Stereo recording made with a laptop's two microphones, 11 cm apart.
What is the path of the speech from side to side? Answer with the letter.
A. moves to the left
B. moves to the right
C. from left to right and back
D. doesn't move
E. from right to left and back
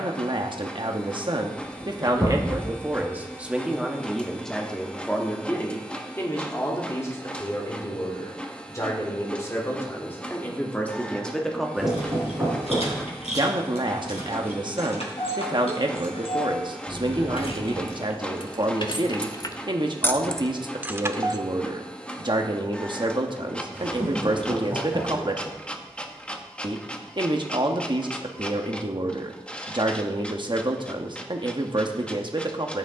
E.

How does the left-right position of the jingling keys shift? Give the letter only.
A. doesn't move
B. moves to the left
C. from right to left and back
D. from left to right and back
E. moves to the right
E.